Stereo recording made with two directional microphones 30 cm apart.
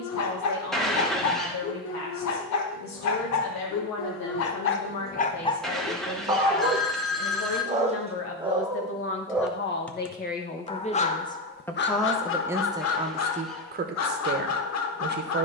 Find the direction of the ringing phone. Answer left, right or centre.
centre.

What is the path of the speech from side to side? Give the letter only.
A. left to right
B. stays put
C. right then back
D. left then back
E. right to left
A.